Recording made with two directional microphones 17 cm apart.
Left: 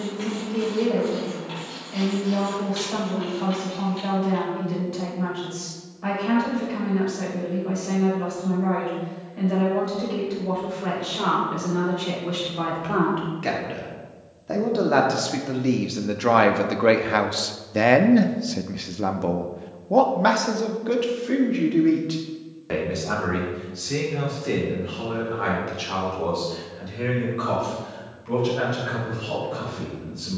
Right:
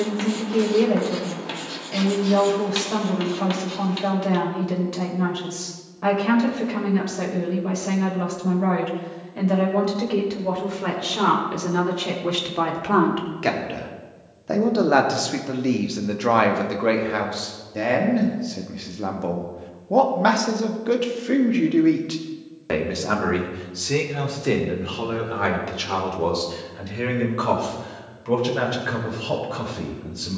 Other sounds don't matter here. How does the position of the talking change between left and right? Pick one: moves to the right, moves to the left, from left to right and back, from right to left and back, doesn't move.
from right to left and back.